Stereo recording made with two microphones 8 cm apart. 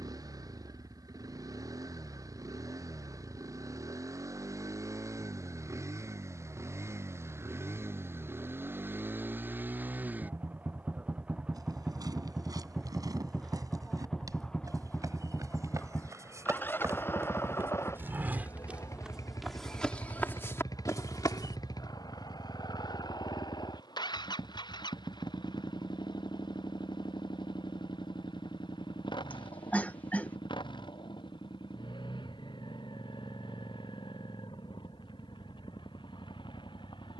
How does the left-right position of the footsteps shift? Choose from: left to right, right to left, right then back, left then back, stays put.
right to left.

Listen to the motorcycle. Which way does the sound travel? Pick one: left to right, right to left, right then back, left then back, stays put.
right to left.